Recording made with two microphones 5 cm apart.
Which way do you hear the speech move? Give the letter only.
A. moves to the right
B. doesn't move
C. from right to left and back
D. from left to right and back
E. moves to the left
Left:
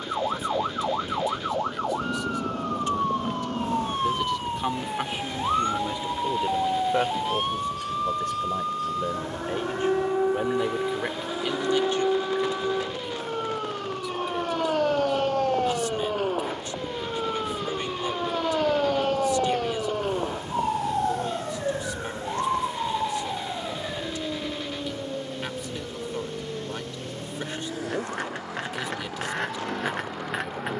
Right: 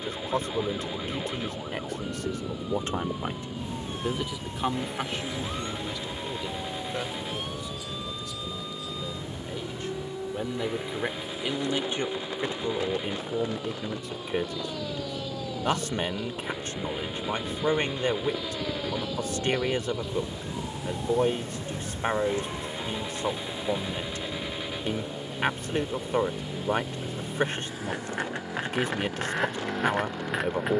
C.